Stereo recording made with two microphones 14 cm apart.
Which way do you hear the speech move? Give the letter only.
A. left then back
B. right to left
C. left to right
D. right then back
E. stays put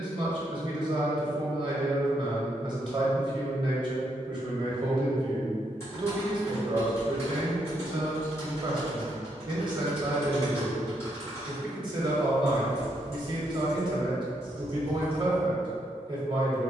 E.